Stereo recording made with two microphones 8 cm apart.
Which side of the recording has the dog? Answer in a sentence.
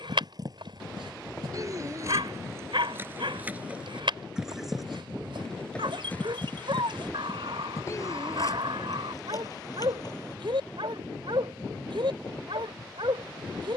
In this clip you hear the dog on the right.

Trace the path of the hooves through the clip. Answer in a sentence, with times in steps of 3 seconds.
In this clip you hear the hooves on the right from 0 s, in the centre from 3 s, on the left from 6 s and not at all from 12 s.